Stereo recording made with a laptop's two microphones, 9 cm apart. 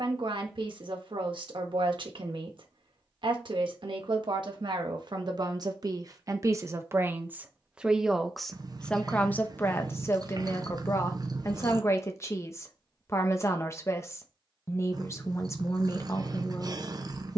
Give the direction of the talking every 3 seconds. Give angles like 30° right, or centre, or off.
60° right, 50° right, 20° right, 30° left, 30° left, 30° left.